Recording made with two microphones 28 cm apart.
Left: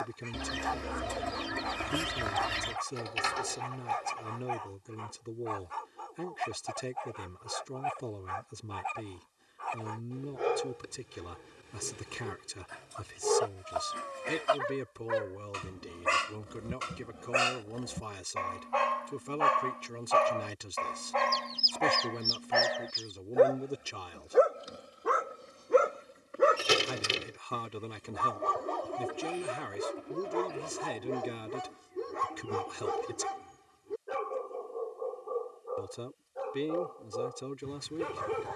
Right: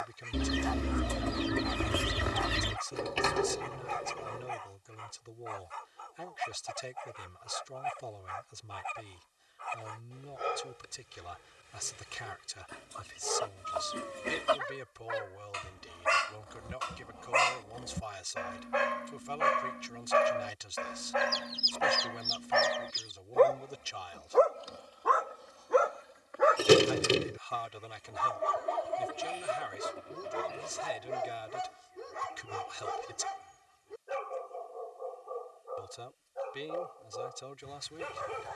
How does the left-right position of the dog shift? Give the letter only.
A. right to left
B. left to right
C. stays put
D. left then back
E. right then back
E.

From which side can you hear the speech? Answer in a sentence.
You can hear the speech on the left.